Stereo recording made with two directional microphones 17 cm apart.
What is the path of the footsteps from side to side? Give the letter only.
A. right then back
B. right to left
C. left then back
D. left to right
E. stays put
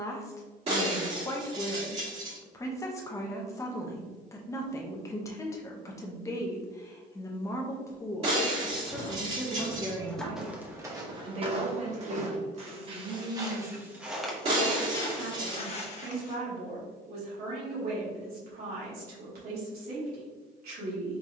A.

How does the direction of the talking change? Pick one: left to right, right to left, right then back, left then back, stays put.
left to right.